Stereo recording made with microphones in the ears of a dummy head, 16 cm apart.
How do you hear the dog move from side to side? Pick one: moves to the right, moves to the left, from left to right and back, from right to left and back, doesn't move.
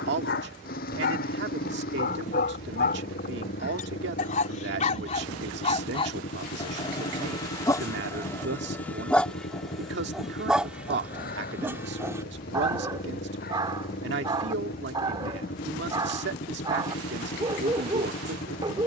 moves to the right.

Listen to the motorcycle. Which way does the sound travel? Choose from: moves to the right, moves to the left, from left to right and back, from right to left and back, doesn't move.
doesn't move.